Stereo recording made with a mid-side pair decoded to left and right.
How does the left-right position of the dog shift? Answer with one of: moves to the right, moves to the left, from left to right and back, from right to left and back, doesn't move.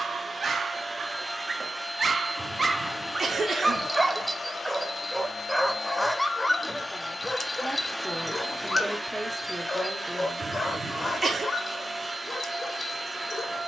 moves to the left.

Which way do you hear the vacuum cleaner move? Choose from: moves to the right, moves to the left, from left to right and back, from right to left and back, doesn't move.
from right to left and back.